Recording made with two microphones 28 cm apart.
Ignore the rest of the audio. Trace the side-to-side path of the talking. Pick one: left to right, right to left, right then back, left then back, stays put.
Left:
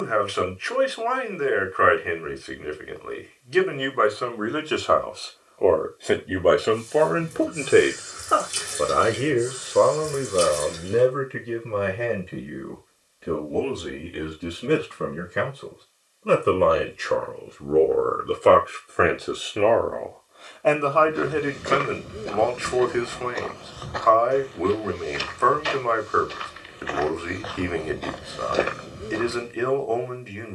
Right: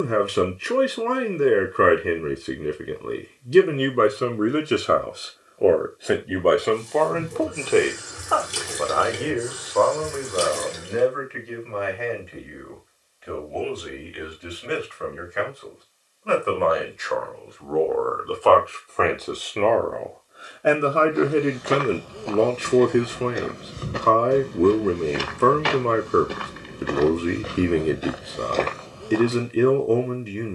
left then back.